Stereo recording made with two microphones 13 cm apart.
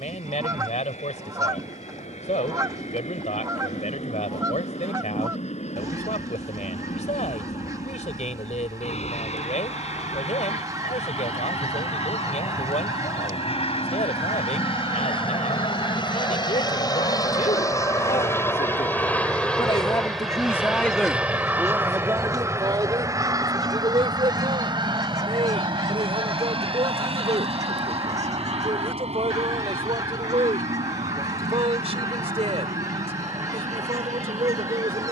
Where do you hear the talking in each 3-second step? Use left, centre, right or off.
left, left, left, left, left, left, left, right, right, right, right, right.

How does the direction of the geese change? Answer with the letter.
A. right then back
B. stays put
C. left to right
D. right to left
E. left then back
B.